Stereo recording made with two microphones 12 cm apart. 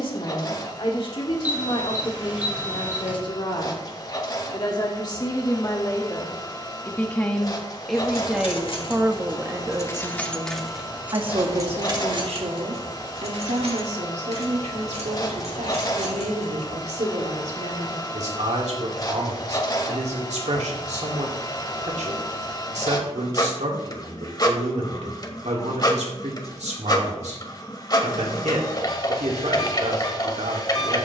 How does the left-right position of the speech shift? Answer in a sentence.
You can hear the speech move from left to right.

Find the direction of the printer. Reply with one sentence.
In this clip you hear the printer on the left.